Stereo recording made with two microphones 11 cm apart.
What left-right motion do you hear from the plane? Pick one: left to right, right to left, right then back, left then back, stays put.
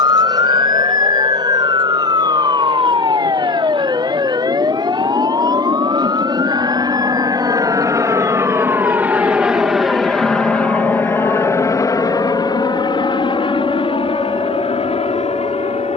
right to left.